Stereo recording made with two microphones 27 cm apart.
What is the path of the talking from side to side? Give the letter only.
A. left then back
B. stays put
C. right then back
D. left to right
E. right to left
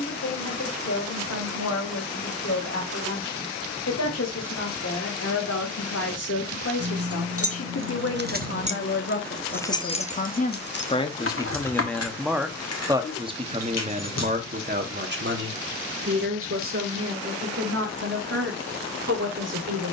D.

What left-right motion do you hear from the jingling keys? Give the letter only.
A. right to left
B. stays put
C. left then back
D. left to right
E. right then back
A.